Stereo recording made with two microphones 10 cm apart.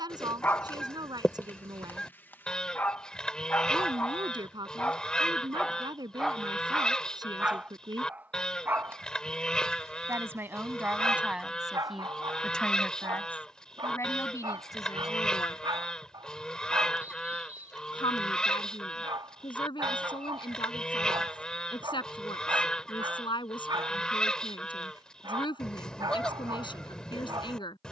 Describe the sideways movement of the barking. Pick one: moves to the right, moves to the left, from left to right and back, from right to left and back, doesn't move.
moves to the right.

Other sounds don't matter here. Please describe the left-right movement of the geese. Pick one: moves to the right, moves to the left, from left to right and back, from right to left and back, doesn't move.
doesn't move.